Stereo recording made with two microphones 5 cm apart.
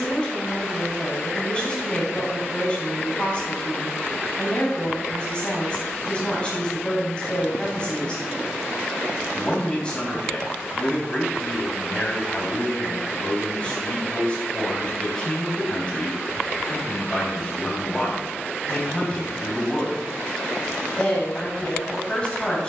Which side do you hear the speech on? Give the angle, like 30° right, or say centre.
20° left.